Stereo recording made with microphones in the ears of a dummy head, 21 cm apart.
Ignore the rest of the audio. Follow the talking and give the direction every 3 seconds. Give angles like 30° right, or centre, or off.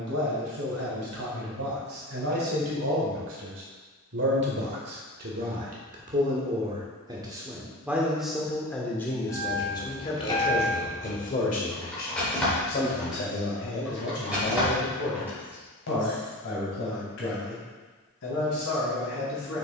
70° right, 50° right, 10° right, 30° left, 50° left, 60° left, 60° left.